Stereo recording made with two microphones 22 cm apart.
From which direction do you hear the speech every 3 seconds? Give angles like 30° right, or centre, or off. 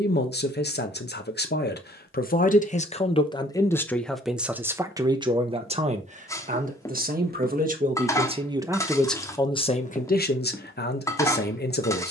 50° left, centre, 30° right, 40° left.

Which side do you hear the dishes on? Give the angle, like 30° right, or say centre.
10° left.